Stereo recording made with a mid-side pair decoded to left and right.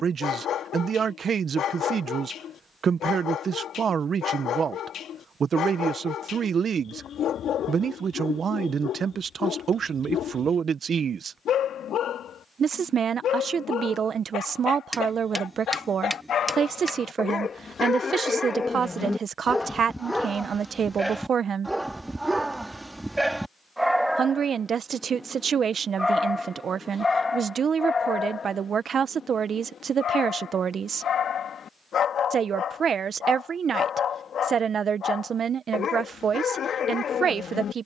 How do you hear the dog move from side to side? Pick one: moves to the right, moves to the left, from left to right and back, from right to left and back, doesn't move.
from left to right and back.